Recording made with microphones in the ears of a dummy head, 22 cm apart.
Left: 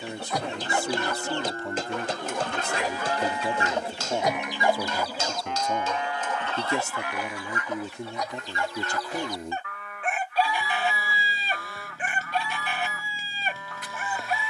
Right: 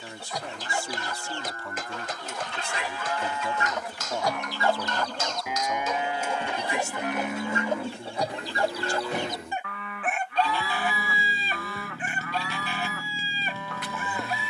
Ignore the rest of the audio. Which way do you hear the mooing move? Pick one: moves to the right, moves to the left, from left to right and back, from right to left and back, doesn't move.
moves to the right.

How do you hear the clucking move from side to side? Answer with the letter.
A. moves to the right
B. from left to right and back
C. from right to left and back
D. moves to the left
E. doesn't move
B.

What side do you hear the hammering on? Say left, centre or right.
left.